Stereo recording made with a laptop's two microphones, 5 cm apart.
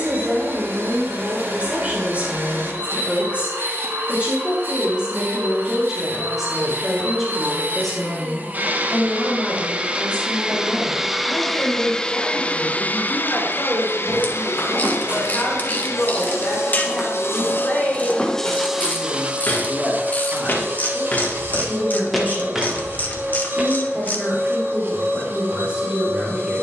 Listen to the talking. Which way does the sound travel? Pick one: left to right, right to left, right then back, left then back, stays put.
left then back.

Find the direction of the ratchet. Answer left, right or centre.
left.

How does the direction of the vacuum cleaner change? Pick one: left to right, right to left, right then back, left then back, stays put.
left then back.